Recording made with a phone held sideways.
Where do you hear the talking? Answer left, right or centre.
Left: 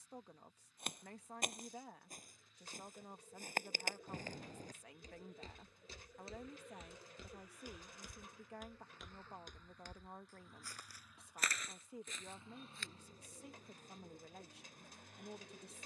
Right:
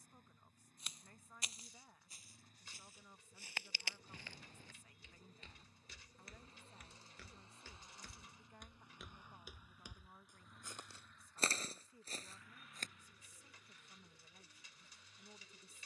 left.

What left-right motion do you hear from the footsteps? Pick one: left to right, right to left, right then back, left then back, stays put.
left to right.